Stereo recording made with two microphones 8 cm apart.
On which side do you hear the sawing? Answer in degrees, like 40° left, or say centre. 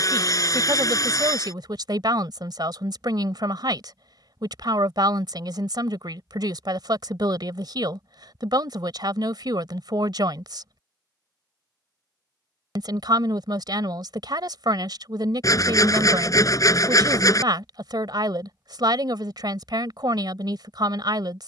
50° left.